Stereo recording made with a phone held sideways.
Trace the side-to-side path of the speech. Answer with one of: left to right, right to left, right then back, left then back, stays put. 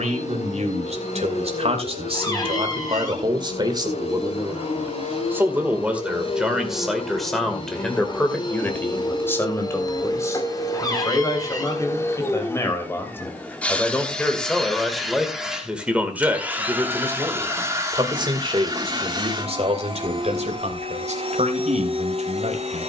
left then back.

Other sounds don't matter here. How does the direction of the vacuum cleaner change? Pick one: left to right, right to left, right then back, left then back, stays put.
left to right.